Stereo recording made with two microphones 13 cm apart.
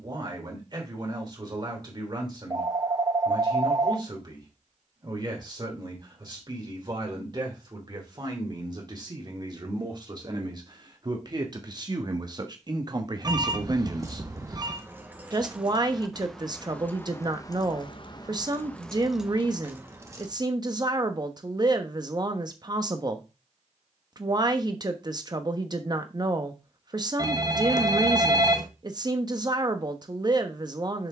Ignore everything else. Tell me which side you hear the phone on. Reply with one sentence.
You can hear the phone on the right.